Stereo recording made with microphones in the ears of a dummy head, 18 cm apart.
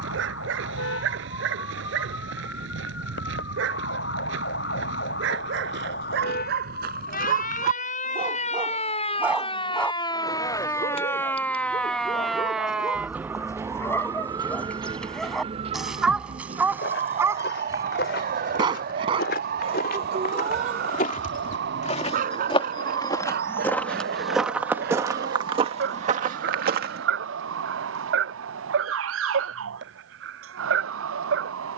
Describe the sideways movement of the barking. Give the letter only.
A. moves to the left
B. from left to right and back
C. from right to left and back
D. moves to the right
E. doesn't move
C.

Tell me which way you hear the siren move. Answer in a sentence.
In this clip you hear the siren travel towards the right.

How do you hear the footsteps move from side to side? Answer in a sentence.
You can hear the footsteps move from left to right.